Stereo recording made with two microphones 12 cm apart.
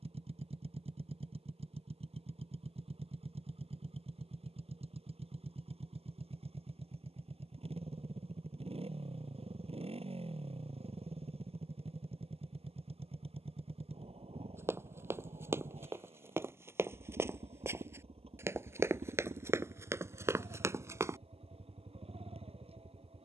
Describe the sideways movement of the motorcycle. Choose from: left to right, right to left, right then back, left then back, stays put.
stays put.